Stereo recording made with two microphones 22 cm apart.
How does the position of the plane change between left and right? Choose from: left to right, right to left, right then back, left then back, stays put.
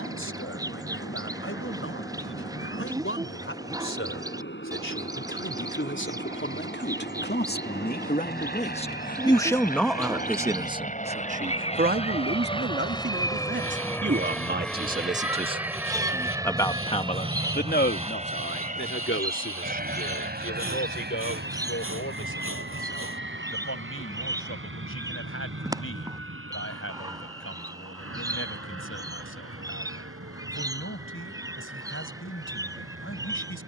left to right.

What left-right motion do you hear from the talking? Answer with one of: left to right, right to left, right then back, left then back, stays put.
right then back.